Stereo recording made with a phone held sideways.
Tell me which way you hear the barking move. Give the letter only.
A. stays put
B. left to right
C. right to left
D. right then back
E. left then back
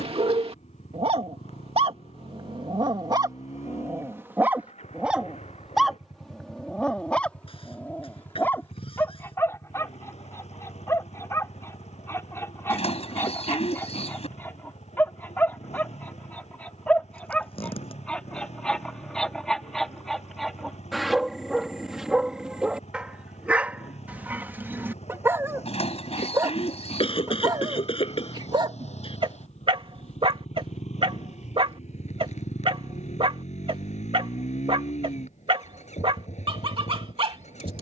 E.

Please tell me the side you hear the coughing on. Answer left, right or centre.
left.